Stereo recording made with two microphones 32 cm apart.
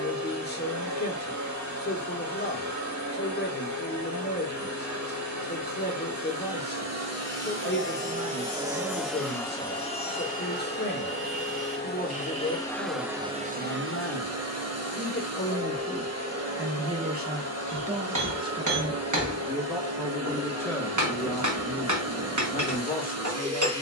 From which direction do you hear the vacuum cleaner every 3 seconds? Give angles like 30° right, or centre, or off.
60° right, 60° right, 40° right, 20° left, 20° right, 50° right, 50° right, 50° right.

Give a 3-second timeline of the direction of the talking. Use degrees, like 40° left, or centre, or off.
30° left, 30° left, 30° left, 30° left, 30° left, centre, centre, 20° left.